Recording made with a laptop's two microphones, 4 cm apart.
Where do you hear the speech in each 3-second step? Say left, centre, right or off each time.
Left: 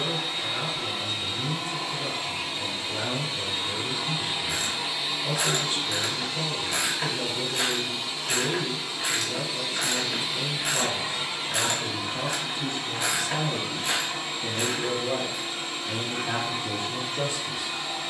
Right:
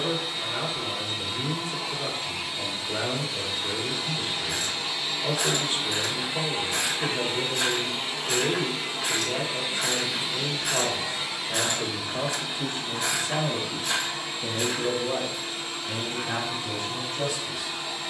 right, right, right, right, right, left.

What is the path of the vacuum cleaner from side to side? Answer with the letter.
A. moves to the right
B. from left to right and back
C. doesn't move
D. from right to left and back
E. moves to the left
B.